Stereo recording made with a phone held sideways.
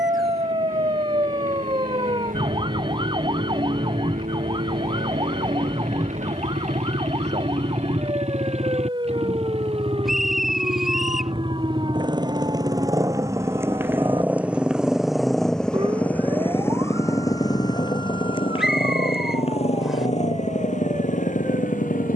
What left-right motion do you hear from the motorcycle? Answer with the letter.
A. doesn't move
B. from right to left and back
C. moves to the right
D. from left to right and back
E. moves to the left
E.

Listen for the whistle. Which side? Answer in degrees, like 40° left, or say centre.
centre.